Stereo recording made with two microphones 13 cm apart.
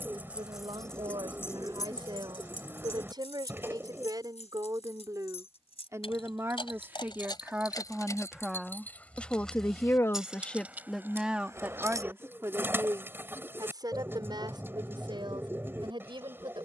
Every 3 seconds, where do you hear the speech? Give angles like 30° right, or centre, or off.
40° right, 30° right, 10° right, centre, 30° right, 40° right.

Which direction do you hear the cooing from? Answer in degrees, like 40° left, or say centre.
20° right.